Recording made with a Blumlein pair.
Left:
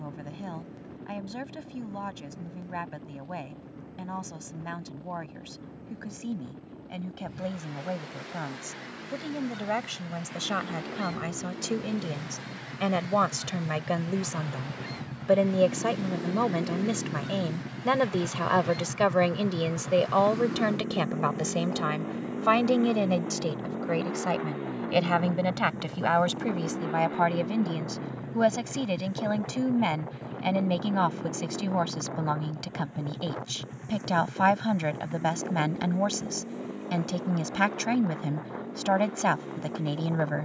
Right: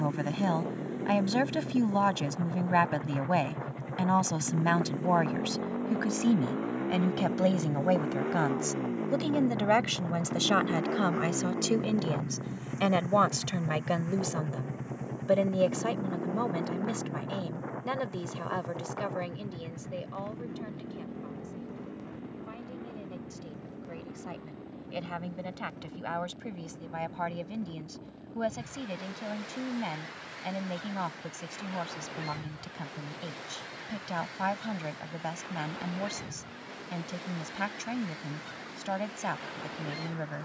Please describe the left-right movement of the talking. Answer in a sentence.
You can hear the talking travel towards the left.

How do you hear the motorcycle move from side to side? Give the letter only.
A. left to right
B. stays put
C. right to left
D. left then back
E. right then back
C.